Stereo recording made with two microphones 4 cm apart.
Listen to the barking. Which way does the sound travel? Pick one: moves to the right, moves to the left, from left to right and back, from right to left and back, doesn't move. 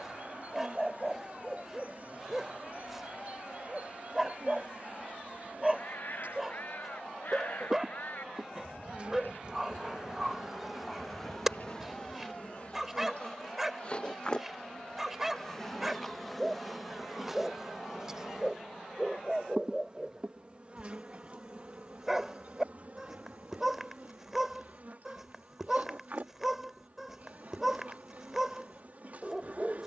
doesn't move.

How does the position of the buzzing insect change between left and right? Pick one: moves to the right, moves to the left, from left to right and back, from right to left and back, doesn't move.
from right to left and back.